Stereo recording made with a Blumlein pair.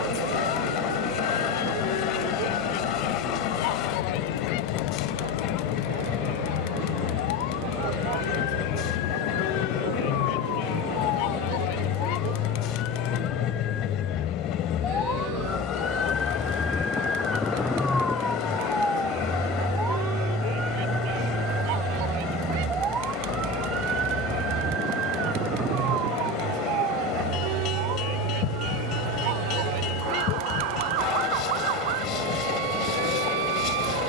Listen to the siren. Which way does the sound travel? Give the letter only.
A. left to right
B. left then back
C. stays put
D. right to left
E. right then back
A.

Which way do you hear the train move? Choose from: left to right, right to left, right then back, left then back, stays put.
stays put.